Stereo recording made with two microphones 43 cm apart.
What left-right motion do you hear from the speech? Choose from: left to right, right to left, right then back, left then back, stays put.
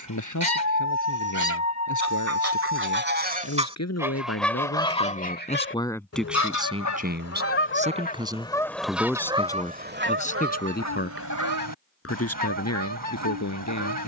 right then back.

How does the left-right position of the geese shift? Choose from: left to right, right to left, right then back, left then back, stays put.
left then back.